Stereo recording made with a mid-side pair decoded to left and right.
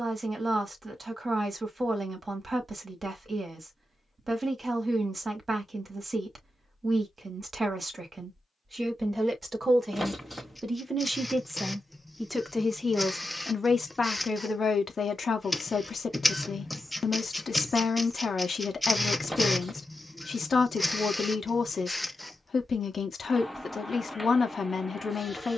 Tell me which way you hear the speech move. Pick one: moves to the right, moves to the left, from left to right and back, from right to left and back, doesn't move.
moves to the left.